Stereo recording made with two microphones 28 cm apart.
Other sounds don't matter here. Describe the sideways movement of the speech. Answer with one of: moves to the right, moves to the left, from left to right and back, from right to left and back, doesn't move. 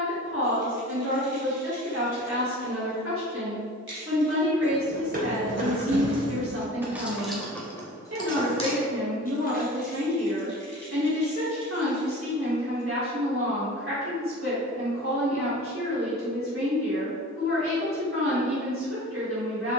doesn't move.